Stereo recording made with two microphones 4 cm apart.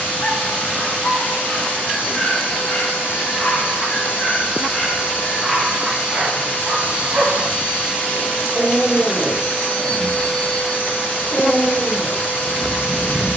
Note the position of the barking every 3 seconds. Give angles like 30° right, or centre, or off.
40° left, 10° left, 40° right, centre, 30° left.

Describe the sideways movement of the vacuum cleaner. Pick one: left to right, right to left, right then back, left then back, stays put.
stays put.